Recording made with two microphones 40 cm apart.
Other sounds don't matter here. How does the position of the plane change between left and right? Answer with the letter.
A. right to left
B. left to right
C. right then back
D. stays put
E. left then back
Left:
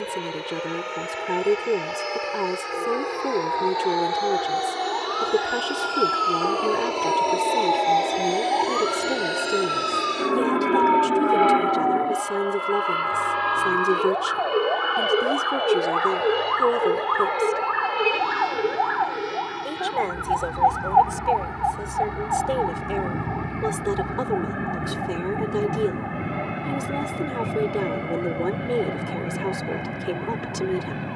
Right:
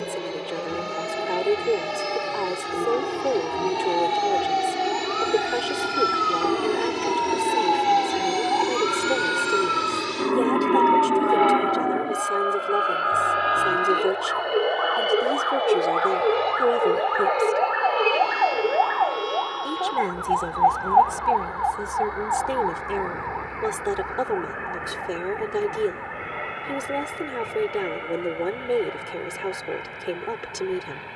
A.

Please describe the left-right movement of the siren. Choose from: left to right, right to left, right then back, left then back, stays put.
right to left.